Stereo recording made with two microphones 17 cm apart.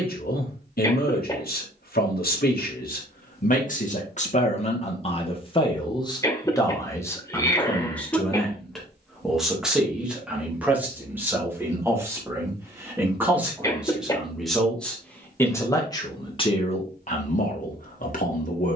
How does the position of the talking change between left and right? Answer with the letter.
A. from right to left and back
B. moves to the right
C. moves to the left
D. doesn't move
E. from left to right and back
E.